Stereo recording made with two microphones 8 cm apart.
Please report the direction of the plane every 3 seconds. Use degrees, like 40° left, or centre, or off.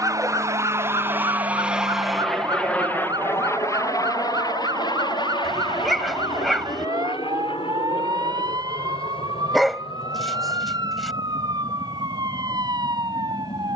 20° right, 40° left, 70° left, 70° left, 80° left.